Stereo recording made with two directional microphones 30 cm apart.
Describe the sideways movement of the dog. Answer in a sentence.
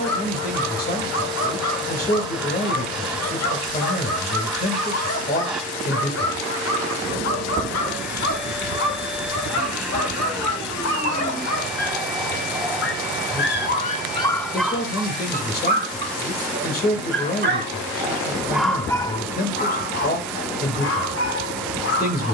You can hear the dog move from left to right and back again.